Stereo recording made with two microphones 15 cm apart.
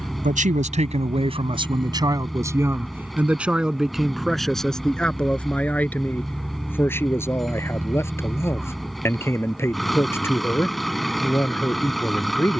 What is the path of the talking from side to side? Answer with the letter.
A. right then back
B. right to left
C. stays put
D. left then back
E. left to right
B.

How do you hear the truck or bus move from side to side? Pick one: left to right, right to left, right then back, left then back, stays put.
stays put.